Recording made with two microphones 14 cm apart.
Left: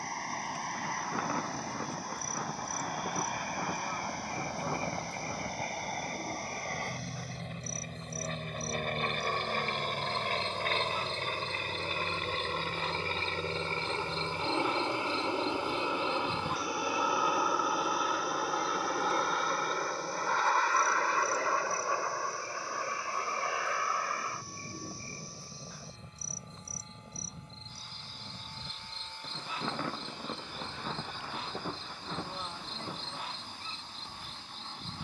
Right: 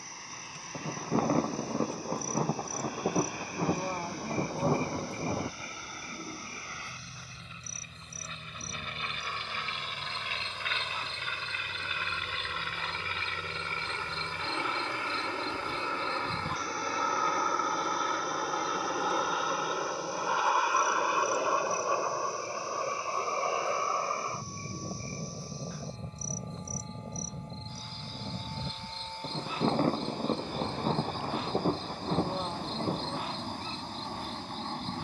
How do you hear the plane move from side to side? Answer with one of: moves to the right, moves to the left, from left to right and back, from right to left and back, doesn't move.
moves to the right.